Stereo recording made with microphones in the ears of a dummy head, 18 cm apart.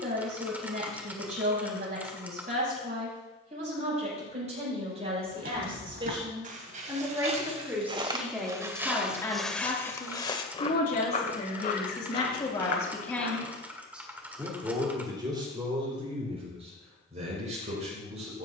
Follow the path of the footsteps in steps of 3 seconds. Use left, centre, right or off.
off, right, right, left, left, off.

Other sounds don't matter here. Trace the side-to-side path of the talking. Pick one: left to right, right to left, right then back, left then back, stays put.
left then back.